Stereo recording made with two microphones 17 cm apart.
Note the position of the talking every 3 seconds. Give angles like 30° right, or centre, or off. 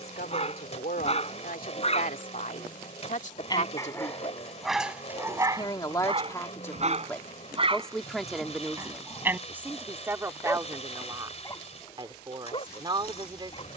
60° left, 30° left, 10° left, 20° right, 30° right.